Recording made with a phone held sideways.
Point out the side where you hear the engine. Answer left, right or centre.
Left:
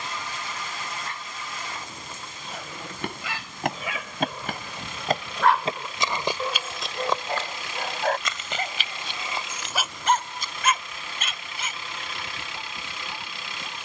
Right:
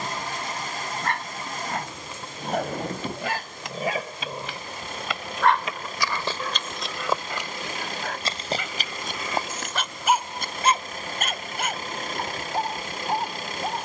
right.